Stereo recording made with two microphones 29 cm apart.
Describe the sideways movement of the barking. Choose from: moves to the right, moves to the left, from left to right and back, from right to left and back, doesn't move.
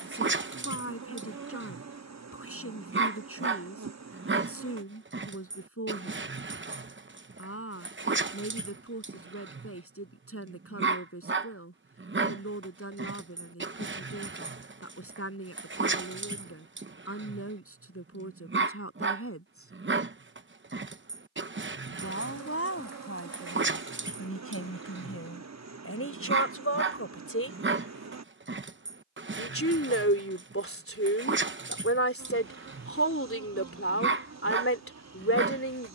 doesn't move.